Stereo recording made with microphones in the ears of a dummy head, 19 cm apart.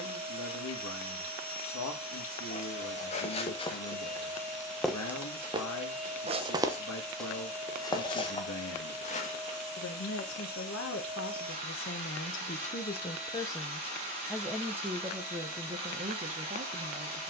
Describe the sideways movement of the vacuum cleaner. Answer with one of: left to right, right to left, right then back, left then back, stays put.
stays put.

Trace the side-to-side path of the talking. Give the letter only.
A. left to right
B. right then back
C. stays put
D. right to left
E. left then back
A.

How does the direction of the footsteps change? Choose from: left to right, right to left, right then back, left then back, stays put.
right then back.